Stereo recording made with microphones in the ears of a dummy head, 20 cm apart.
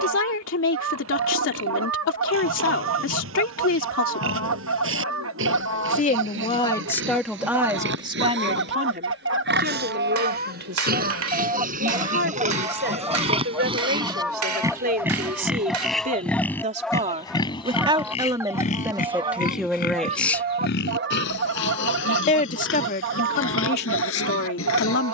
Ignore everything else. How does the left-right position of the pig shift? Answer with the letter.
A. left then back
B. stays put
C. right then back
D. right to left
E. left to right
D.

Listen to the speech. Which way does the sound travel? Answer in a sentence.
In this clip you hear the speech go right and come back.